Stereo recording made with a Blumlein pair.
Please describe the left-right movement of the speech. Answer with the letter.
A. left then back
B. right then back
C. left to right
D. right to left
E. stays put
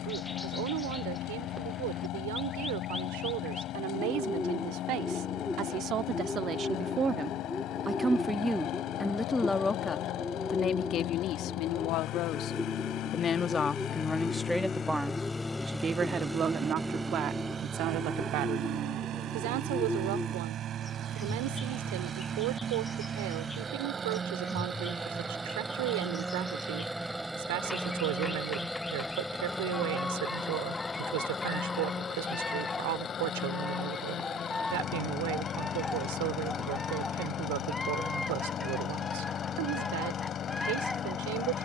A.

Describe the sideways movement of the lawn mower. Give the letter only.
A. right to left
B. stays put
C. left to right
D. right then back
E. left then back
D.